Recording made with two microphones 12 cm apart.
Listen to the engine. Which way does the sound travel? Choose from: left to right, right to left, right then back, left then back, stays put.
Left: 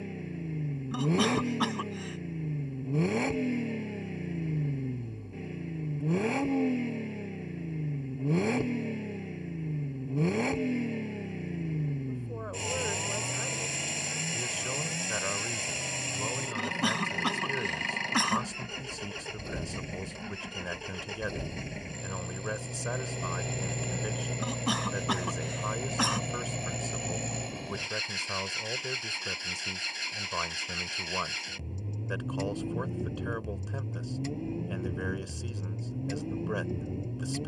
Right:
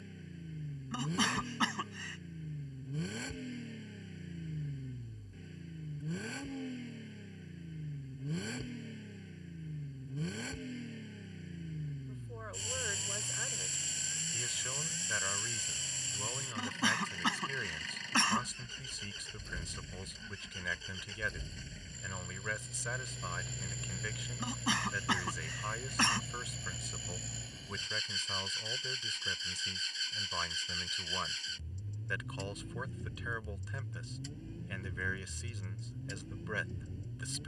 stays put.